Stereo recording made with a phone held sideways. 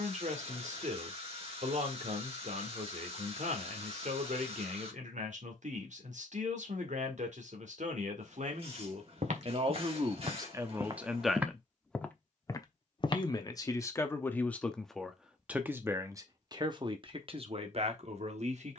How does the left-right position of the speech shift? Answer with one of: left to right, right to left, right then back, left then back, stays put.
left then back.